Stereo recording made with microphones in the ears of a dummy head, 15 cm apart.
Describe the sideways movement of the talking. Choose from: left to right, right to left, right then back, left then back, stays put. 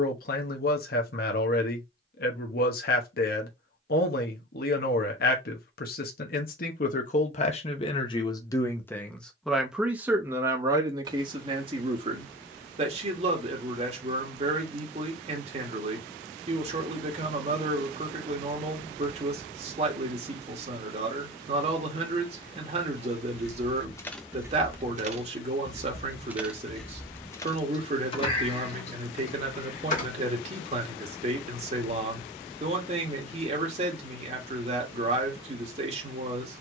left to right.